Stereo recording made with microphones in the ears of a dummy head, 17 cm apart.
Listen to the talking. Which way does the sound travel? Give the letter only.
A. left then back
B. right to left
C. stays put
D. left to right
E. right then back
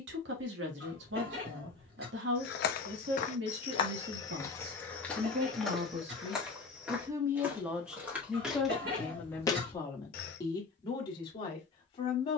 B.